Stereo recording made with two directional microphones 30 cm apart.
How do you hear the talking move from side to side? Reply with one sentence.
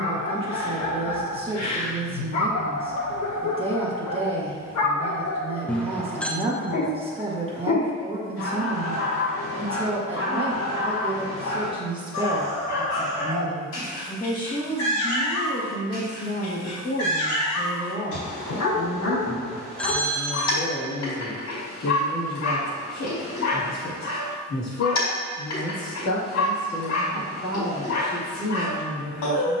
In this clip you hear the talking go from the right side to the left.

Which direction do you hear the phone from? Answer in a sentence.
In this clip you hear the phone in the centre.